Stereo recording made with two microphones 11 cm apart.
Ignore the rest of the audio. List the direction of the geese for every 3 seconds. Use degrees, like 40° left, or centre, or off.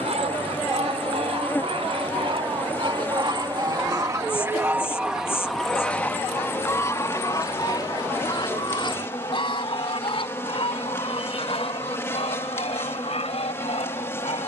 60° right, 20° right, 30° left, 60° left, 60° left.